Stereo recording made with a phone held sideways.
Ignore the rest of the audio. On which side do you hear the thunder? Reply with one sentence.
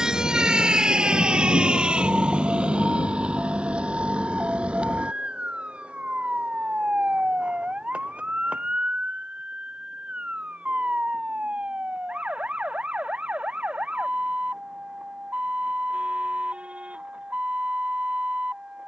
You can hear the thunder on the left.